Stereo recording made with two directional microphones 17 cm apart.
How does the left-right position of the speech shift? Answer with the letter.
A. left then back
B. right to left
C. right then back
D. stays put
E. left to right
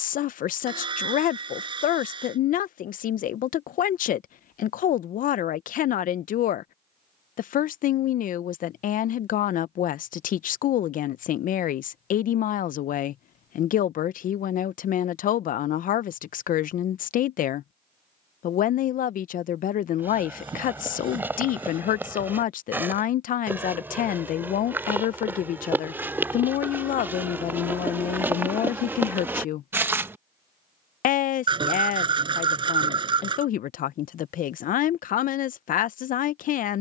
D.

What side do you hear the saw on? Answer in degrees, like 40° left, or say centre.
30° right.